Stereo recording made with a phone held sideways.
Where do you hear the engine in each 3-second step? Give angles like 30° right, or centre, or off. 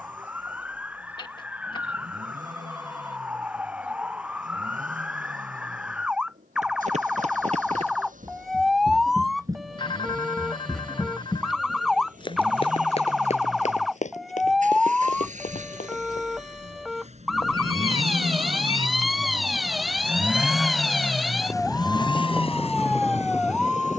80° right, 80° right, 70° right, 70° right, 70° right, 60° right, 20° right, 40° left.